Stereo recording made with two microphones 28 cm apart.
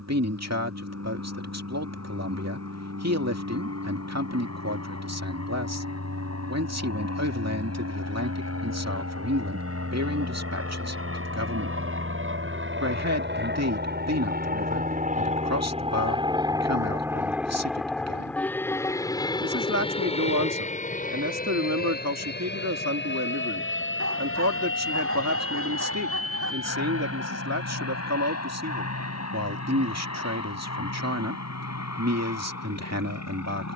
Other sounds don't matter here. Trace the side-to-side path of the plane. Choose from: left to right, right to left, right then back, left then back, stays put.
right to left.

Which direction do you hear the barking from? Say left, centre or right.
right.